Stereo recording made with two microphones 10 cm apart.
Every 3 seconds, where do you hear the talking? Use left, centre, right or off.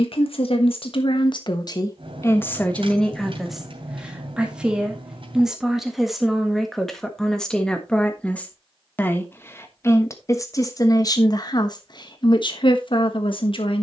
left, centre, centre, left, left.